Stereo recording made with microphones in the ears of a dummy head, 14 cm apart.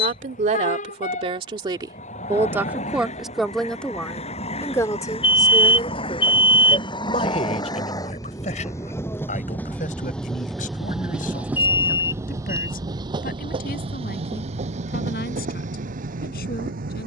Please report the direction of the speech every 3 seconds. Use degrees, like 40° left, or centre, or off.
30° right, 10° left, 40° left, 50° left, 60° left, 60° left.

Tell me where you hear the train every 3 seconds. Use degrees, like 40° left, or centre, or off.
50° left, 40° left, 30° left, centre, 30° right, 60° right.